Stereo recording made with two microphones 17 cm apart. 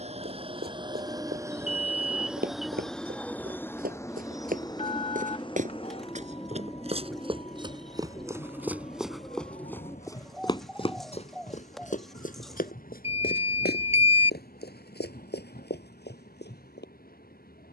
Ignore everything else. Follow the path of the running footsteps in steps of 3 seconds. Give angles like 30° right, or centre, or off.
60° right, 50° right, 30° right, 20° left, 60° left, 70° left.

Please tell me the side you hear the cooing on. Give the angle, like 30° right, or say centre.
centre.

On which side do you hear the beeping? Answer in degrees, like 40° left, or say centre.
40° left.